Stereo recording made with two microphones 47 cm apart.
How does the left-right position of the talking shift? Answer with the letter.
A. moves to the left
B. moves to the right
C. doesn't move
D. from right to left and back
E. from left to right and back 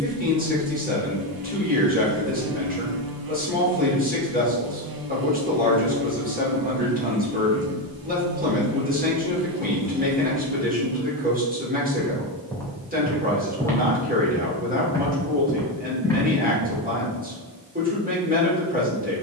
C.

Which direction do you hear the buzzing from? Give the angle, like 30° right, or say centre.
50° right.